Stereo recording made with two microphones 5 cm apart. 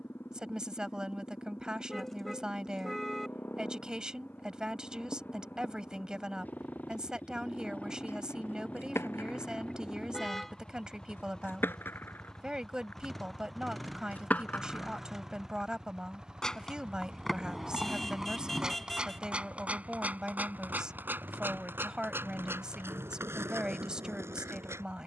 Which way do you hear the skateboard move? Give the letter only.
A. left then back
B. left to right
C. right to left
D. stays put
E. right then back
B.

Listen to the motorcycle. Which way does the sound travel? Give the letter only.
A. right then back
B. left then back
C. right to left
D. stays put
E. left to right
E.